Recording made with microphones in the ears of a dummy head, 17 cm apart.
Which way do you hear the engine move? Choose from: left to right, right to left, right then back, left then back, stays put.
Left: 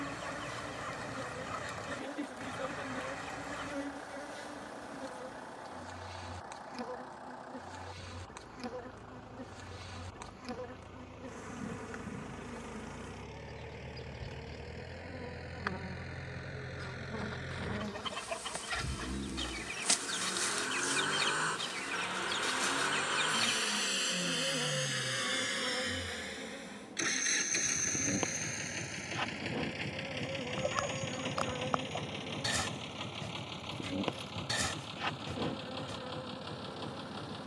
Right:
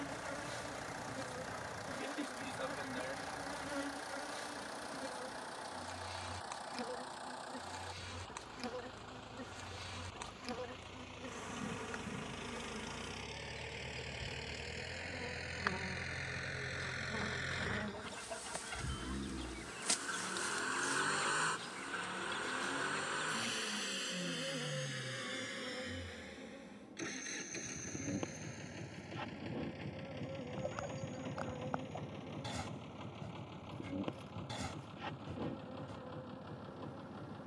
right to left.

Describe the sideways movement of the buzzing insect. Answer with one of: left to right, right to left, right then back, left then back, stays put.
right to left.